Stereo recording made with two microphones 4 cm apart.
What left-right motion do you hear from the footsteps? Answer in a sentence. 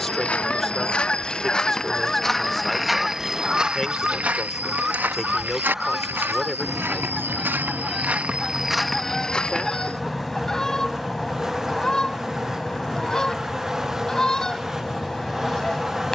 In this clip you hear the footsteps move from left to right and back again.